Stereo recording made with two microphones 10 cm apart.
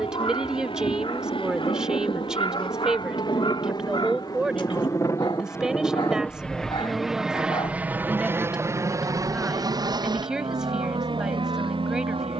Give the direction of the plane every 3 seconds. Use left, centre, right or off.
left, left, centre, right.